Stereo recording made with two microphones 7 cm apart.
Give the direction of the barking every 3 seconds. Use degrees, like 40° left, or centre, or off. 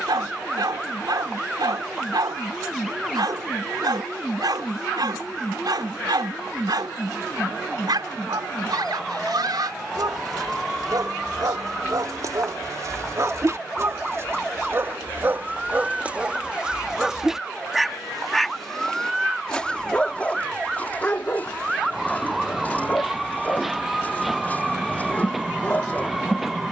70° right, 70° right, 70° right, 60° right, 40° right, 20° right, 10° left, 20° left, 20° left.